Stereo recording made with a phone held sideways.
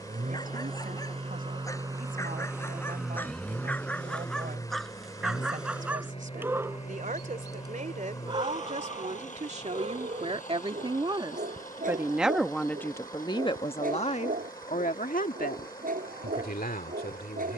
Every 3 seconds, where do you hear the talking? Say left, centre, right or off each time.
right, right, right, right, left, left.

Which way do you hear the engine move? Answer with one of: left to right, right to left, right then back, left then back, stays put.
right to left.